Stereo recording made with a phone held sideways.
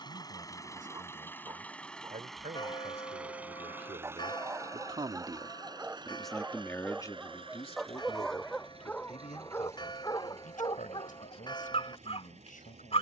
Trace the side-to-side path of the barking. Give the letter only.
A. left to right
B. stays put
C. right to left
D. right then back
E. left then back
C.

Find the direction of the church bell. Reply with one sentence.
In this clip you hear the church bell on the left.